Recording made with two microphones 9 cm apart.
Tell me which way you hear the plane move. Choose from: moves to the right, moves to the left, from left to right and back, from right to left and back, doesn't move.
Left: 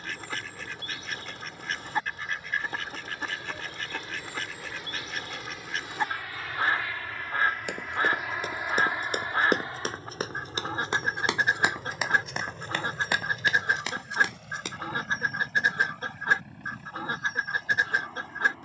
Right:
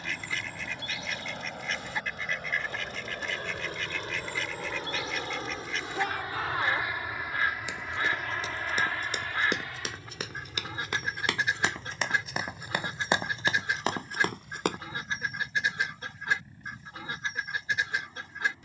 moves to the left.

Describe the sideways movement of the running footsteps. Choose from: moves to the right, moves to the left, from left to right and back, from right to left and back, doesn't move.
moves to the right.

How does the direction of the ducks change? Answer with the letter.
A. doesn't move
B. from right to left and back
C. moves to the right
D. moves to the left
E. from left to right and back
A.